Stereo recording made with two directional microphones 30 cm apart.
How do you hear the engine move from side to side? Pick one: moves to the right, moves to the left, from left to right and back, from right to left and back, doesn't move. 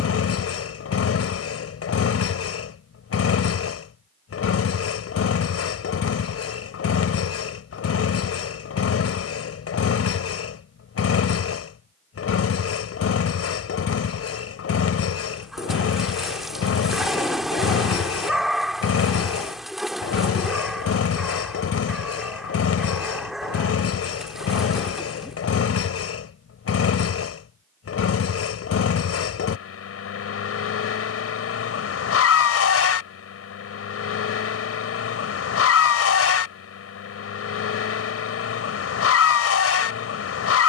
doesn't move.